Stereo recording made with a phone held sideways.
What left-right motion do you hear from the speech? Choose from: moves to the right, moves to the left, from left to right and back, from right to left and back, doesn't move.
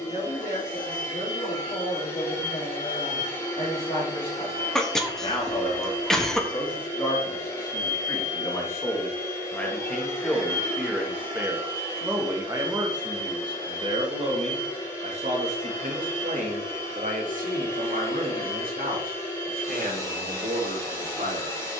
moves to the right.